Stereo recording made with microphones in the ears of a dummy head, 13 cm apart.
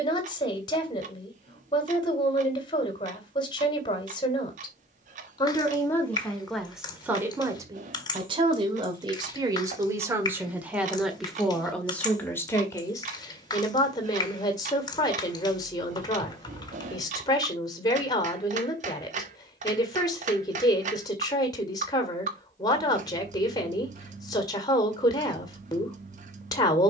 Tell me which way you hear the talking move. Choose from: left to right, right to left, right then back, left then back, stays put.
right then back.